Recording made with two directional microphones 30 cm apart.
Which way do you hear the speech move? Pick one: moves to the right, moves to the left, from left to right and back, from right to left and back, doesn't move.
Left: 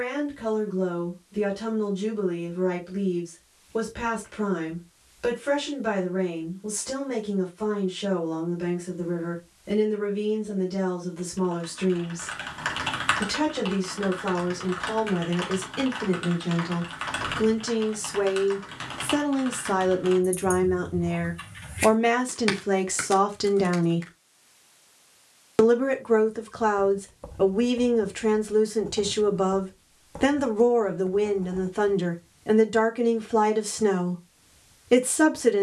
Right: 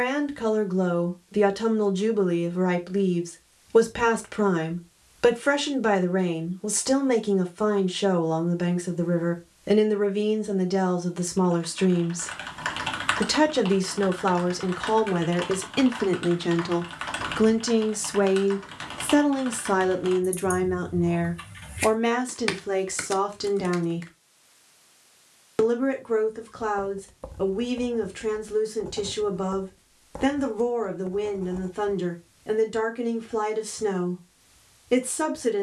moves to the left.